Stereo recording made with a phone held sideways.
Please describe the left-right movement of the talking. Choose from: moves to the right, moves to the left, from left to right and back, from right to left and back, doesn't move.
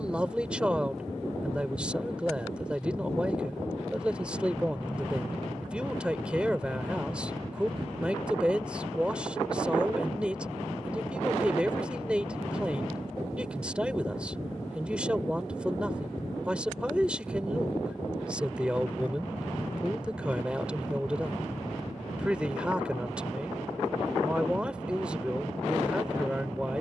doesn't move.